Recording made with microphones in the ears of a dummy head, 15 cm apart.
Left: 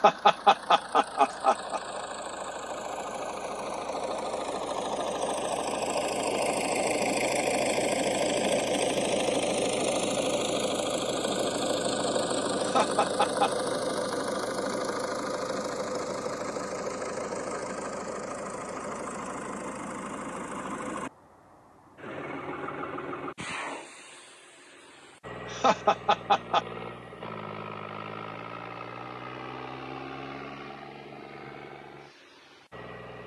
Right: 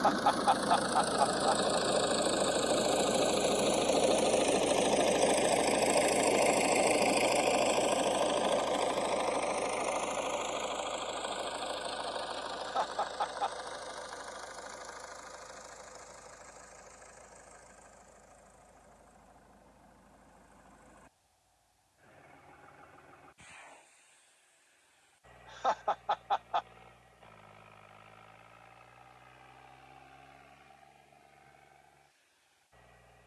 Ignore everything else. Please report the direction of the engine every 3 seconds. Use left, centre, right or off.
right, right, centre, left, left, left, left, left, left, left, left.